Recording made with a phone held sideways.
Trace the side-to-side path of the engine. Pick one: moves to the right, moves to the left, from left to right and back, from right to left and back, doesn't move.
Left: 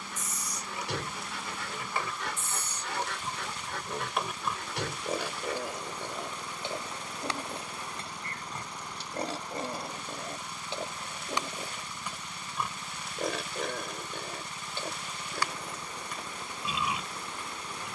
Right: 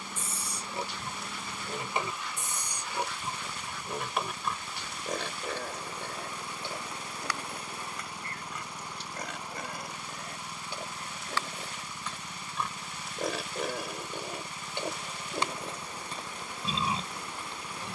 doesn't move.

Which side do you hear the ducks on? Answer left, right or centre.
left.